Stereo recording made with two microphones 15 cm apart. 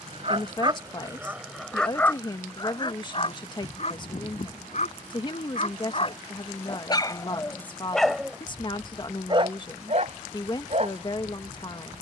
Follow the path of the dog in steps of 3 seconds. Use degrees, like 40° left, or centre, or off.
10° right, 50° left, 10° left, 50° right.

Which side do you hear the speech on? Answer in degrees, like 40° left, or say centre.
30° left.